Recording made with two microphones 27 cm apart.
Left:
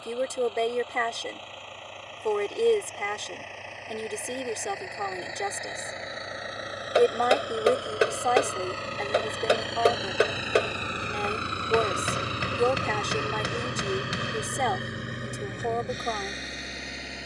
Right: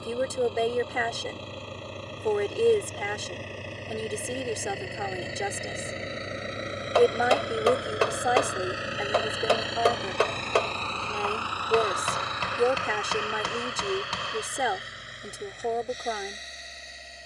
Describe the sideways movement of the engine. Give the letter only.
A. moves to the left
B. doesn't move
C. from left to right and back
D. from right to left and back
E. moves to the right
A.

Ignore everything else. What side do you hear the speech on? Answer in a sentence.
In this clip you hear the speech in the centre.